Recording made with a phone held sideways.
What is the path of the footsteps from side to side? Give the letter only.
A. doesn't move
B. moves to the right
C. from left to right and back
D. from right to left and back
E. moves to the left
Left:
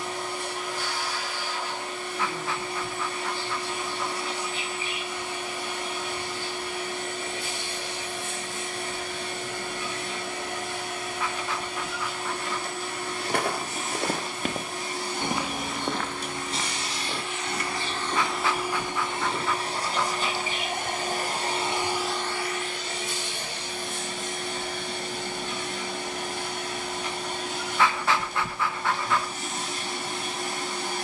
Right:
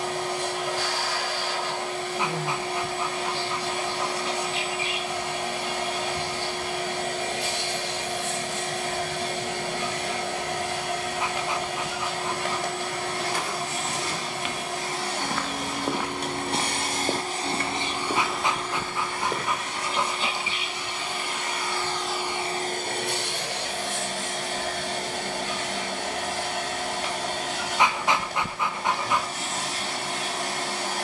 B.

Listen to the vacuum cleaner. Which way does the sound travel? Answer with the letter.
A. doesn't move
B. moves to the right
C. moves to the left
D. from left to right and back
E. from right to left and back
E.